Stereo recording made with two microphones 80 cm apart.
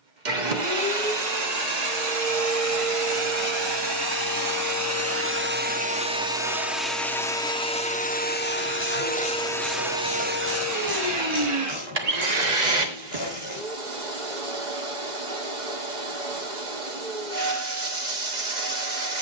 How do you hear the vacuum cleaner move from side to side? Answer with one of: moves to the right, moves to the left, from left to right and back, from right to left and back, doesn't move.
from right to left and back.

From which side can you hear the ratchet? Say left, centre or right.
left.